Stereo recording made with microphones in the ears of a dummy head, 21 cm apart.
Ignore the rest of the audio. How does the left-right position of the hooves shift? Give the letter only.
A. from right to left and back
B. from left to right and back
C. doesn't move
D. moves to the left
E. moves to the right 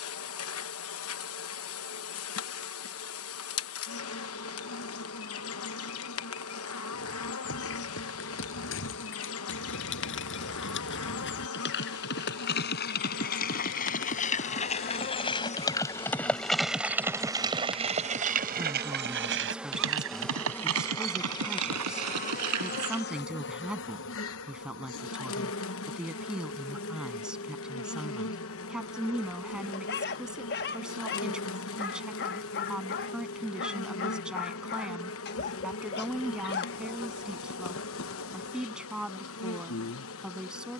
E.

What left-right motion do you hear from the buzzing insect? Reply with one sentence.
In this clip you hear the buzzing insect move from left to right and back again.